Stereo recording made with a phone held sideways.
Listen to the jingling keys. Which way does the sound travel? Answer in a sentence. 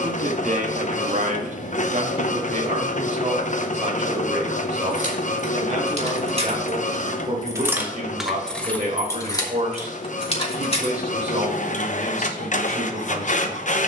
In this clip you hear the jingling keys move to the left.